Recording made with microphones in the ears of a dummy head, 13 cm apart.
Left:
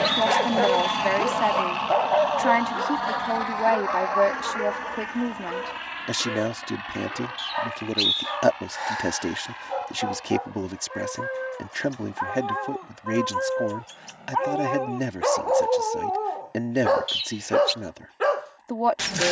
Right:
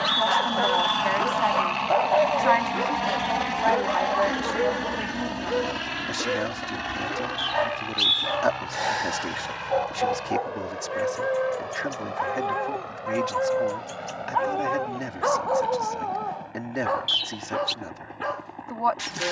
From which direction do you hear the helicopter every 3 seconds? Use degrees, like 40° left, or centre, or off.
centre, 30° right, 50° right, 60° right, 70° right, 70° right, 70° right.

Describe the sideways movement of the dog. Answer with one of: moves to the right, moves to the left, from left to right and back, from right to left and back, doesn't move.
from left to right and back.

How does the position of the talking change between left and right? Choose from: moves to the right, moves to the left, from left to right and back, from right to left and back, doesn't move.
doesn't move.